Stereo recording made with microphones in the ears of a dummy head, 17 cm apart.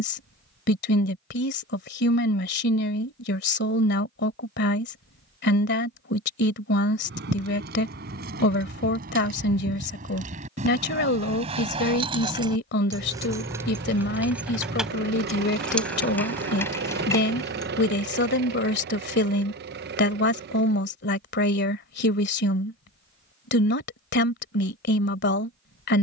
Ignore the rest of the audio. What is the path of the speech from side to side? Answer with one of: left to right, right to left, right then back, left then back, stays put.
stays put.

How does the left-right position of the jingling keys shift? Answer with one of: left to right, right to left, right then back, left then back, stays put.
right to left.